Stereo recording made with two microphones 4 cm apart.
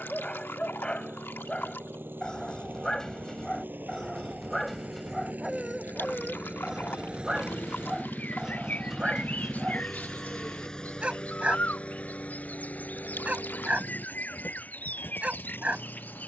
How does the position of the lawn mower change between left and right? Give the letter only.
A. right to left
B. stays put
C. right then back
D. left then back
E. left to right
A.